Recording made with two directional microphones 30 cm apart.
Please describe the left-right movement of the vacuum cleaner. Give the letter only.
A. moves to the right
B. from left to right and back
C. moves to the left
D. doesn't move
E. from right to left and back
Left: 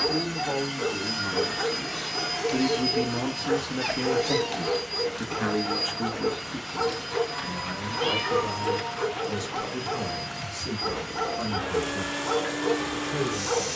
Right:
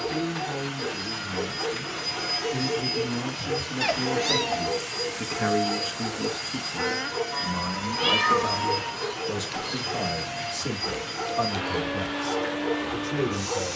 B.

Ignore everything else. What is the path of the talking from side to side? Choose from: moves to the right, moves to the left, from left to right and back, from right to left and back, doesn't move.
moves to the right.